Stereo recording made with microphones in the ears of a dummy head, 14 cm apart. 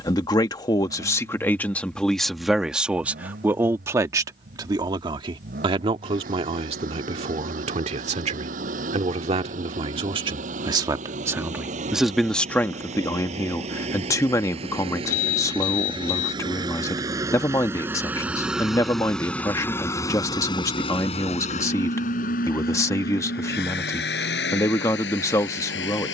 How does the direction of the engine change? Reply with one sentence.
In this clip you hear the engine travel towards the left.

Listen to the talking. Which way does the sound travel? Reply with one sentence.
You can hear the talking move from left to right and back again.